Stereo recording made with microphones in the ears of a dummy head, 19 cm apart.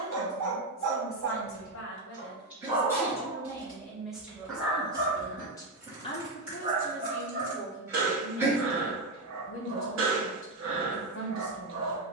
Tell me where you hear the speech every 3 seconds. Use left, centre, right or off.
left, centre, left, left.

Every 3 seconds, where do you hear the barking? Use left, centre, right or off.
right, centre, right, right.